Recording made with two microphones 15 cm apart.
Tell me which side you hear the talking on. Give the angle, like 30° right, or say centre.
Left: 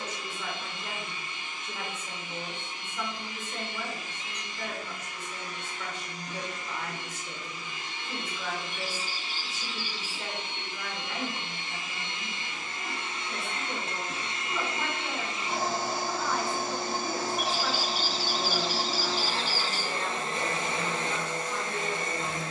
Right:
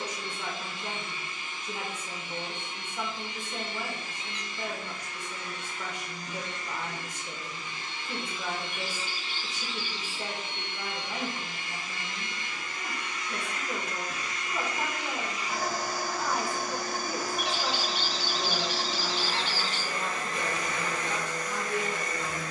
10° right.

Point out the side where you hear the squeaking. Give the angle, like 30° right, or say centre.
40° left.